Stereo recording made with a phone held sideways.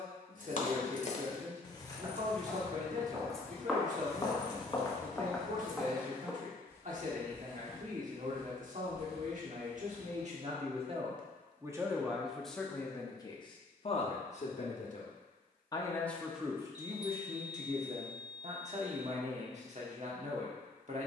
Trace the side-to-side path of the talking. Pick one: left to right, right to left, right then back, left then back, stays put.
left then back.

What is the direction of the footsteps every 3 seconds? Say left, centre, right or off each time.
right, centre, right, right, off, off, off.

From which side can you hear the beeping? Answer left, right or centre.
left.